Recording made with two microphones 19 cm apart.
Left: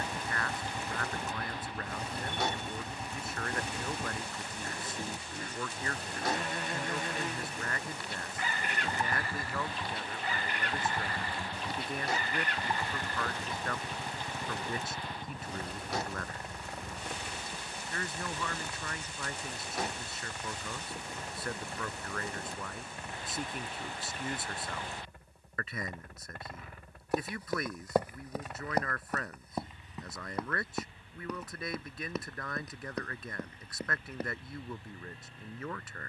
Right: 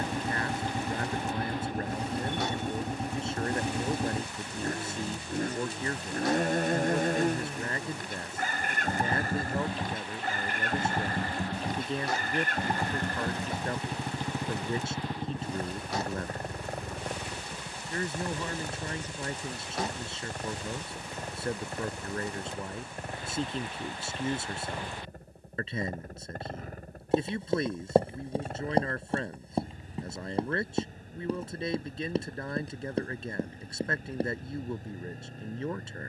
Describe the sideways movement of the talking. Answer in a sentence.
You can hear the talking stay put.